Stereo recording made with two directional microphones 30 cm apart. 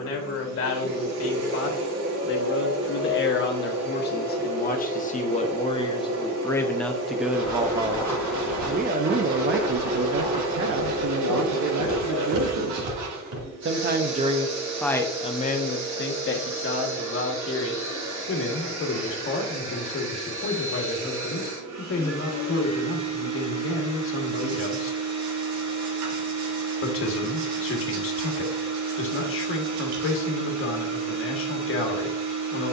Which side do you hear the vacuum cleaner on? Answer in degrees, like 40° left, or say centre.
60° right.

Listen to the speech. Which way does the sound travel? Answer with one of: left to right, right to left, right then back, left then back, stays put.
right then back.